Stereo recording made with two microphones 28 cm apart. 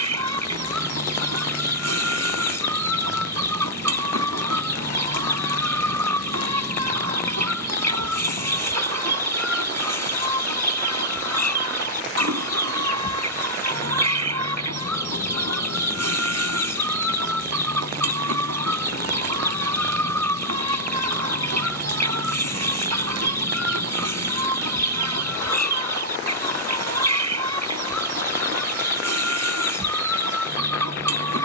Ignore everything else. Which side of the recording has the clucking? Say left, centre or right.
right.